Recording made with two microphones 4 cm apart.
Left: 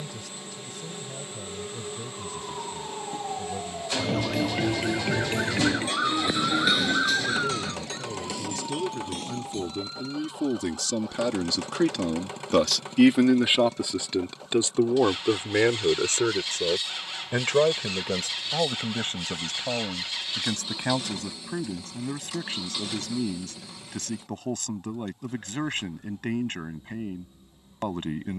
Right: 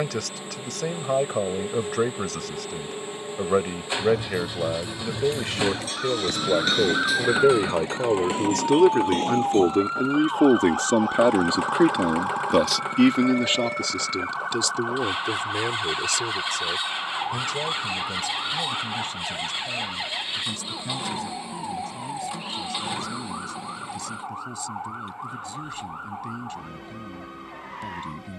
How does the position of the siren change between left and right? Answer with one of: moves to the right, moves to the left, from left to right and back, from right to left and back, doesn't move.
moves to the right.